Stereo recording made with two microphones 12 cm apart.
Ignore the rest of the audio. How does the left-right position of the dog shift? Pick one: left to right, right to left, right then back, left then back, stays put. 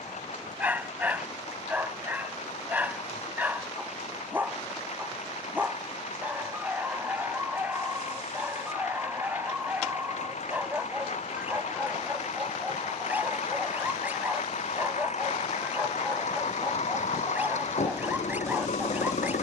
stays put.